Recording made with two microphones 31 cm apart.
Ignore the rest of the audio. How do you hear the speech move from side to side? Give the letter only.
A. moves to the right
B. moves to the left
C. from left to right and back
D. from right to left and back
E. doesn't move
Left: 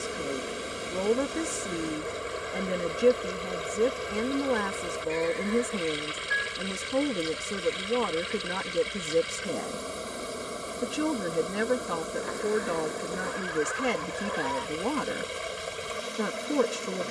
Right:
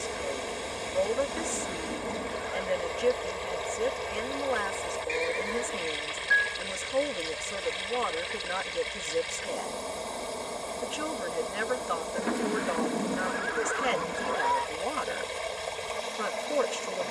E.